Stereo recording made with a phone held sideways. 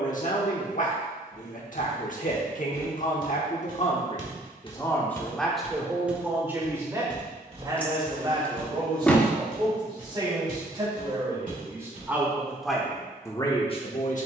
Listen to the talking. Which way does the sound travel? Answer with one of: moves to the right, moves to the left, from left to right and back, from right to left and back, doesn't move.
from left to right and back.